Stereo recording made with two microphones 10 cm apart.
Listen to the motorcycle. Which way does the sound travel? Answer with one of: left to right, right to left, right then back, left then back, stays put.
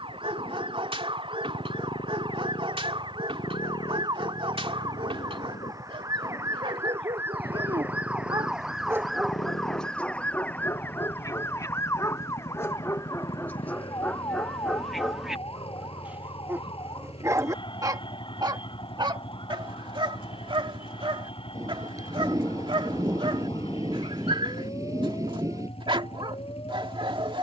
stays put.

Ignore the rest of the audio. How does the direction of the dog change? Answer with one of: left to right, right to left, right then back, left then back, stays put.
left then back.